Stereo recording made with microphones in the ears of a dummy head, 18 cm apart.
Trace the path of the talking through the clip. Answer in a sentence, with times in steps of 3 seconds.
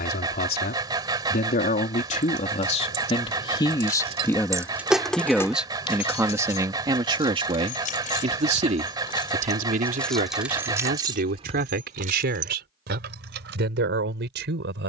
You can hear the talking on the left from 0 s, in the centre from 3 s and on the right from 6 s.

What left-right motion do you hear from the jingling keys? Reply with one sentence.
You can hear the jingling keys move from right to left and back again.